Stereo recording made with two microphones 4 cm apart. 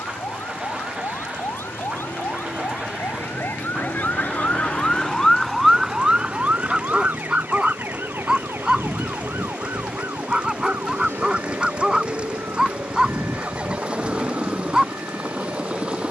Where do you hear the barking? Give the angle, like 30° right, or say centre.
10° right.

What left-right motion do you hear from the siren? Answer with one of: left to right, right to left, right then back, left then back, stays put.
left to right.